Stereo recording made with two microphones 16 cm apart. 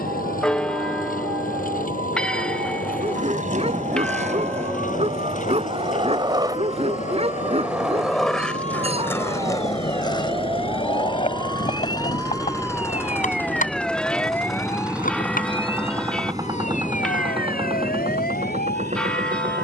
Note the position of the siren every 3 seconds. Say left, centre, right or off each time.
right, right, right, right, centre, left, left.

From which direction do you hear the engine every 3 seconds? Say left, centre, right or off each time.
left, left, left, left, centre, right, right.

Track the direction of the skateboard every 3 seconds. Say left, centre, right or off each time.
off, right, centre, left, left, left, off.